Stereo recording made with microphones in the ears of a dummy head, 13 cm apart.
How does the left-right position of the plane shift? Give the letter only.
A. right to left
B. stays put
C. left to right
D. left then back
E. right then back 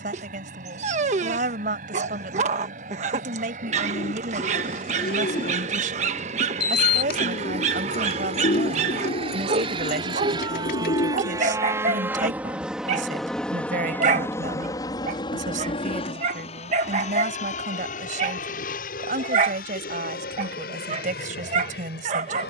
A.